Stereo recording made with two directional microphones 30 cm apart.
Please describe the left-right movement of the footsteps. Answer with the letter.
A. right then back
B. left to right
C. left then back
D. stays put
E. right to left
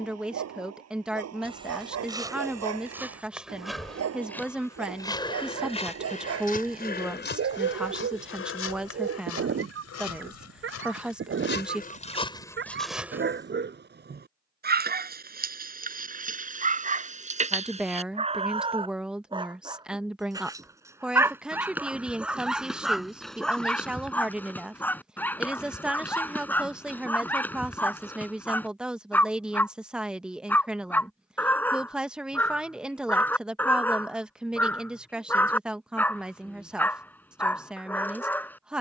C.